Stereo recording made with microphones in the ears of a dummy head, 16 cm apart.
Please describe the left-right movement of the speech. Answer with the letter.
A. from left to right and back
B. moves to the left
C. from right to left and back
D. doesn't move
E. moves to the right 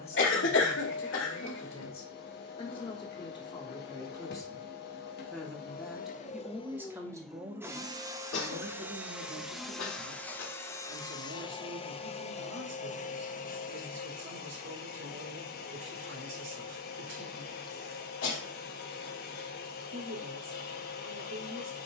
E.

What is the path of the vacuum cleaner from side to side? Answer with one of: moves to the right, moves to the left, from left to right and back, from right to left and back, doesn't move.
from left to right and back.